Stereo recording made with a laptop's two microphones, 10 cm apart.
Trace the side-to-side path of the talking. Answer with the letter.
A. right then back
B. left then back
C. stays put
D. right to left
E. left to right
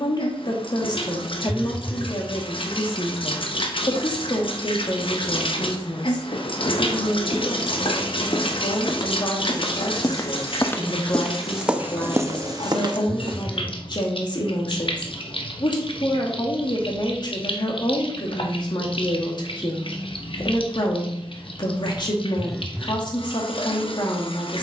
C.